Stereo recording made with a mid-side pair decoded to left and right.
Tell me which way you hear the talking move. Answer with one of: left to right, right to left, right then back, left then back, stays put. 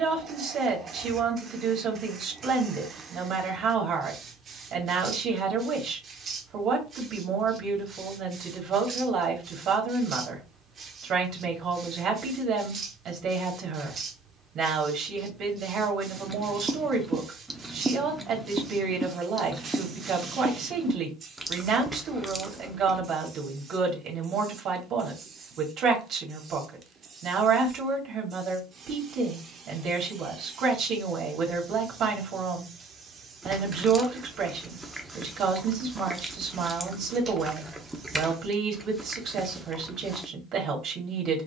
stays put.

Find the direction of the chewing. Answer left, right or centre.
centre.